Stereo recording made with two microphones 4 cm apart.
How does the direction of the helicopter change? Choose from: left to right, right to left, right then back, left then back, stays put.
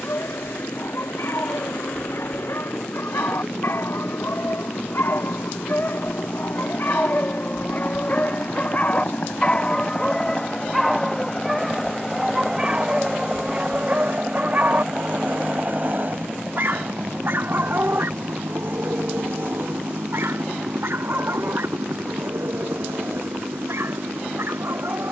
left to right.